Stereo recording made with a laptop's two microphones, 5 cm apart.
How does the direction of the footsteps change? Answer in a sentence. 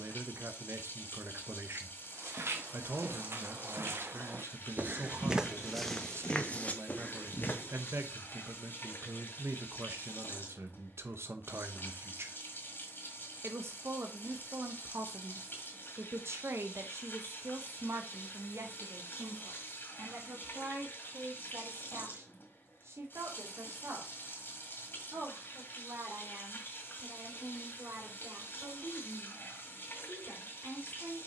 In this clip you hear the footsteps travel towards the left.